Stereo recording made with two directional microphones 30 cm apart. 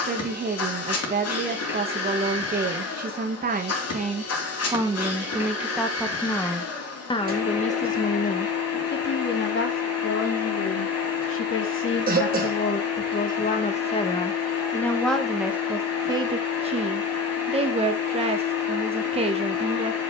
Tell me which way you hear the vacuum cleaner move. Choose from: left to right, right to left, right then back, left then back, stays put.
stays put.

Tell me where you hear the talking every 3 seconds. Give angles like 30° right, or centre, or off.
30° right, 20° right, 20° left, 40° left, 20° left, 10° right, 20° right.